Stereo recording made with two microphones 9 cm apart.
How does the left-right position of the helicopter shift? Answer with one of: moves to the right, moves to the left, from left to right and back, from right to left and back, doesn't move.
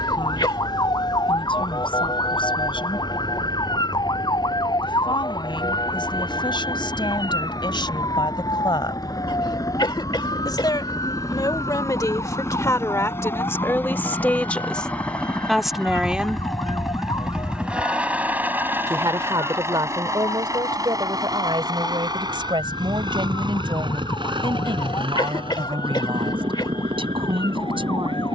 moves to the right.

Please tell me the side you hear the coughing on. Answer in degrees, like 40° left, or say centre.
60° left.